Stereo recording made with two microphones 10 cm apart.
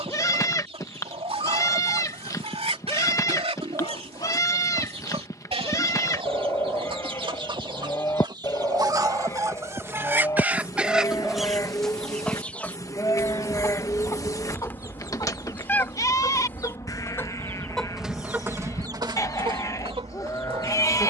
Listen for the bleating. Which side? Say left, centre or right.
left.